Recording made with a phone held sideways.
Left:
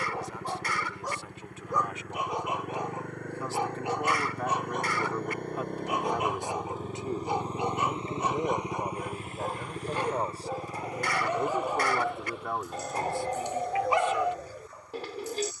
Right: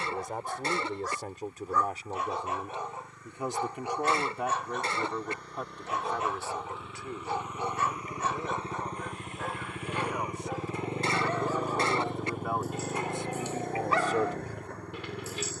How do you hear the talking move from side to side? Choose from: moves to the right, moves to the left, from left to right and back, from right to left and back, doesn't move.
from right to left and back.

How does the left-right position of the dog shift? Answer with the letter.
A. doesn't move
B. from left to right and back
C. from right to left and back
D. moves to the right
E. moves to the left
A.